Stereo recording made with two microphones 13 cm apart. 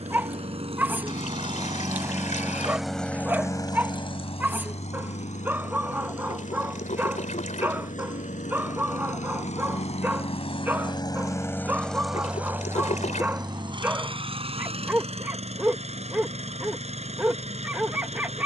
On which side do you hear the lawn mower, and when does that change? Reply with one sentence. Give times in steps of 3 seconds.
You can hear the lawn mower on the right from 0 s, on the left from 3 s and on the right from 12 s.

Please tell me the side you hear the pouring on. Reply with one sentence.
In this clip you hear the pouring on the left.